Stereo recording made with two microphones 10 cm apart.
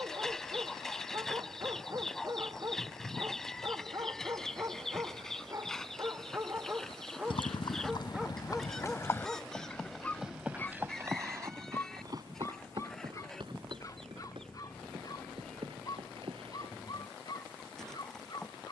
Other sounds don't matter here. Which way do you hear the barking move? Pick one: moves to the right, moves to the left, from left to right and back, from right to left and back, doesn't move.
moves to the left.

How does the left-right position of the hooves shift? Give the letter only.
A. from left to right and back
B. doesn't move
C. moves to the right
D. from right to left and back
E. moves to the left
C.